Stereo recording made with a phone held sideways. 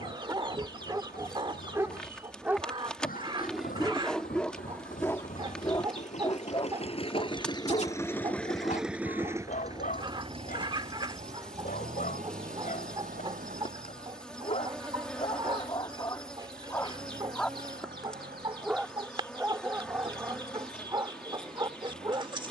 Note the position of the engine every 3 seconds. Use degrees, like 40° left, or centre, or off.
80° left, 70° left, 30° left, 40° right, 60° right, 70° right, 80° right, 80° right.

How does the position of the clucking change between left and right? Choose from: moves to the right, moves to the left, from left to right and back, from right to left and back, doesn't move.
doesn't move.